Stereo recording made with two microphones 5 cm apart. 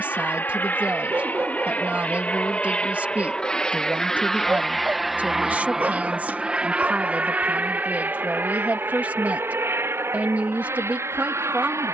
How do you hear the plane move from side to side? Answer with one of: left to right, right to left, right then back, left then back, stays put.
left to right.